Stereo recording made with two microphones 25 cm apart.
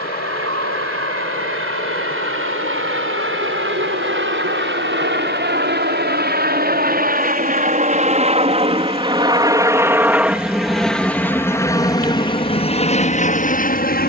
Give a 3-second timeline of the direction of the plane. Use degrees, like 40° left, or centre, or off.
60° right, 50° right, 30° right, centre, 30° left.